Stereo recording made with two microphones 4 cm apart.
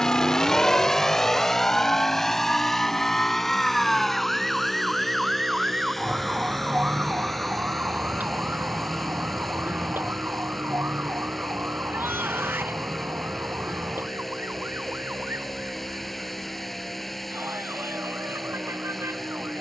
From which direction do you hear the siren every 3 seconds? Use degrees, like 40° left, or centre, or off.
30° left, centre, 30° right, 50° right, 60° right, 60° right, 70° right.